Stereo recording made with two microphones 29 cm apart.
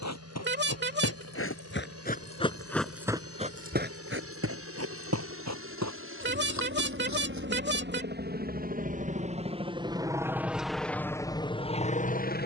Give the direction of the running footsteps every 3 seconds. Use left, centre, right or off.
left, right, right, off.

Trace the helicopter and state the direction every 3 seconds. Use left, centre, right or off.
right, right, right, centre.